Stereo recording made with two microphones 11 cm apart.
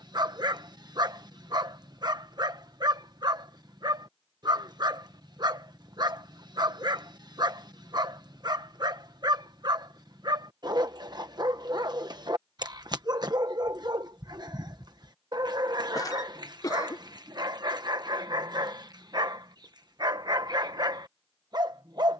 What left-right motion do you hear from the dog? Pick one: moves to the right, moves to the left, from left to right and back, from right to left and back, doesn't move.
doesn't move.